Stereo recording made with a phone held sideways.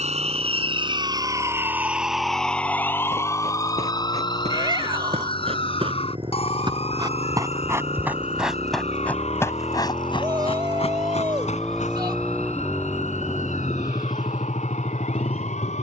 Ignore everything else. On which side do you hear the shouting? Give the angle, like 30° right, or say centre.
30° right.